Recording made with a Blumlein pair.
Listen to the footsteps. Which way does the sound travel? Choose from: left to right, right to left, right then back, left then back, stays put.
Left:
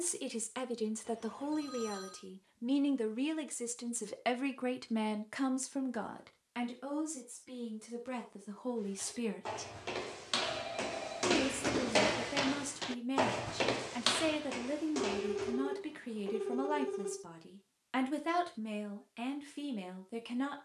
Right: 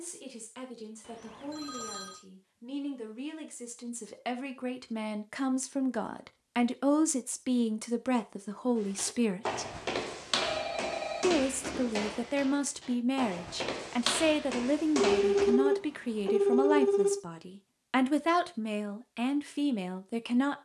left then back.